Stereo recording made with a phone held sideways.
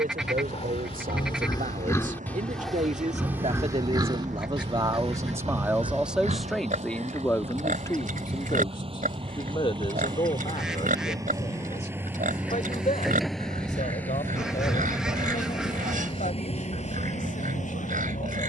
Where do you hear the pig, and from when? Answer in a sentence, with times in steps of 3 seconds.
You can hear the pig on the left from 0 s and on the right from 3 s.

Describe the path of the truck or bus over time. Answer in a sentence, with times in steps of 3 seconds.
You can hear the truck or bus on the right from 0 s, in the centre from 12 s and on the left from 15 s.